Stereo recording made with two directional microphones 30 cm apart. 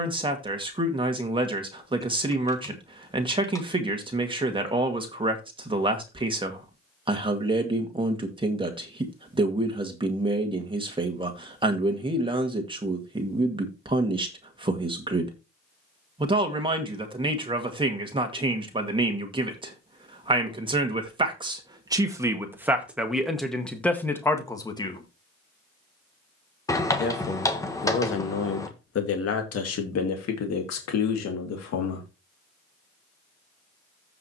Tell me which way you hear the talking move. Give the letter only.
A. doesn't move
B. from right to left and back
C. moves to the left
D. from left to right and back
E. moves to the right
C.